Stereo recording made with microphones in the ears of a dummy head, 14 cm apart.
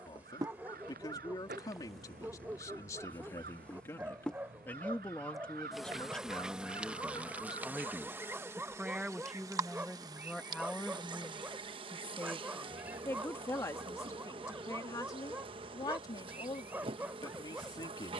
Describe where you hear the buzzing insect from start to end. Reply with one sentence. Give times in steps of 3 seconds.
In this clip you hear the buzzing insect in the centre from 0 s and on the right from 9 s.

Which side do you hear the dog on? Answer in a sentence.
In this clip you hear the dog in the centre.